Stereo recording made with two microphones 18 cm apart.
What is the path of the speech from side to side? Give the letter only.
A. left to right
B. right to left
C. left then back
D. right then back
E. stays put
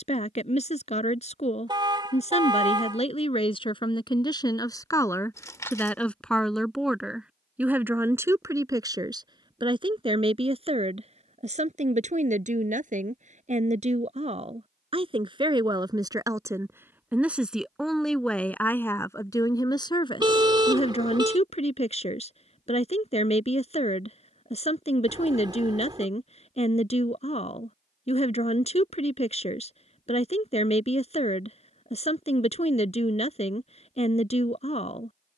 D.